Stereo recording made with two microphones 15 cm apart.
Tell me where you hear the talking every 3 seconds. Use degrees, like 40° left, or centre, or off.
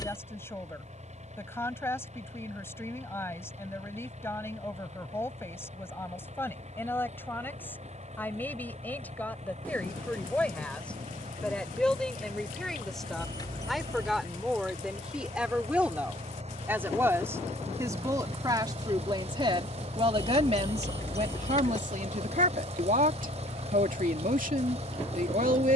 20° left, 20° left, 10° left, 10° left, centre, 10° right, 30° right, 60° right, 60° right.